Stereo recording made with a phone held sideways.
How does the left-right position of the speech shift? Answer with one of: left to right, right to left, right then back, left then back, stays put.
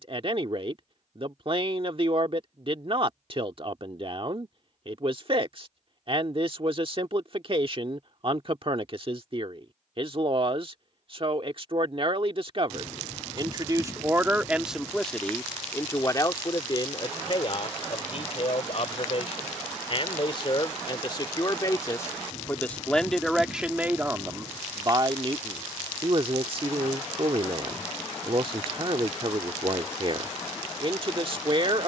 left then back.